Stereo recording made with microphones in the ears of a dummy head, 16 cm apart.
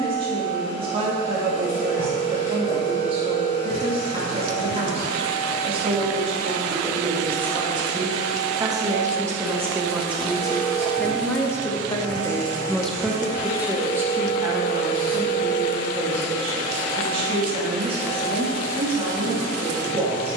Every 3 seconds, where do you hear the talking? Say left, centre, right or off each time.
right, right, right, centre, centre, right, right.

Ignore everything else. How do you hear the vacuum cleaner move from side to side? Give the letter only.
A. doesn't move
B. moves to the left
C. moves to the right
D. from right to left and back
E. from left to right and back
C.